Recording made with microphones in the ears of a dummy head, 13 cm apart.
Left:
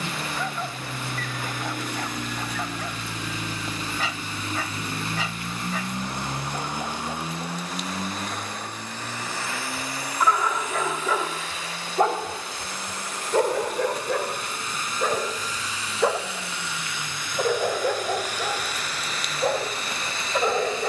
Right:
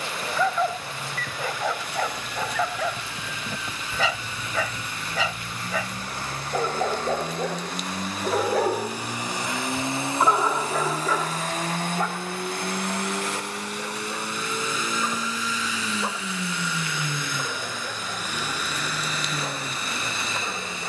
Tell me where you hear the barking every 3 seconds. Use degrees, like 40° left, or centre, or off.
70° right, 70° right, 60° right, centre, 50° left, 60° left, 60° left.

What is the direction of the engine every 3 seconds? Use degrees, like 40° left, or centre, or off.
40° left, 30° left, 10° left, 30° right, 50° right, 70° right, 80° right.